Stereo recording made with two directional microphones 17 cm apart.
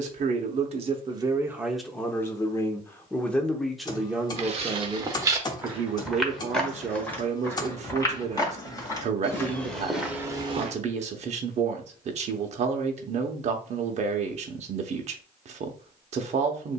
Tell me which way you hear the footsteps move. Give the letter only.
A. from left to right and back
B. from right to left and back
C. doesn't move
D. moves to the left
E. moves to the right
B.